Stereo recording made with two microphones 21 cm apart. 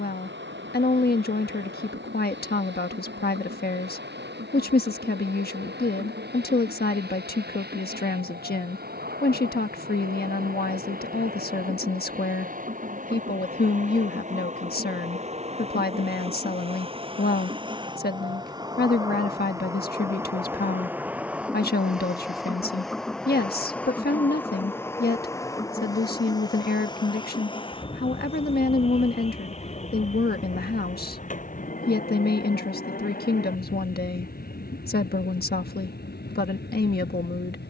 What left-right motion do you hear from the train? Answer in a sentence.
In this clip you hear the train move from right to left.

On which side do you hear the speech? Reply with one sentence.
You can hear the speech on the left.